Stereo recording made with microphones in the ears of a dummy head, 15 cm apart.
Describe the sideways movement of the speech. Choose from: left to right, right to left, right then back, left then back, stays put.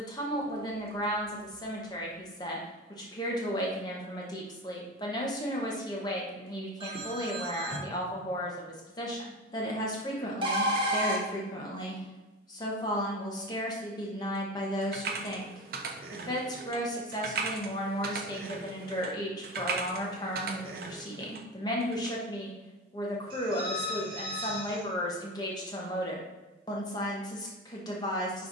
stays put.